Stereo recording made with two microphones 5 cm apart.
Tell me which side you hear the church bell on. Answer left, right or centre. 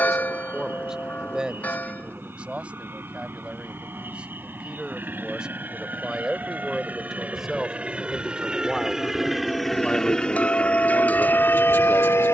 left.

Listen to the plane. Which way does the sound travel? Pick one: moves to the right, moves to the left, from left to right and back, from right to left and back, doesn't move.
moves to the left.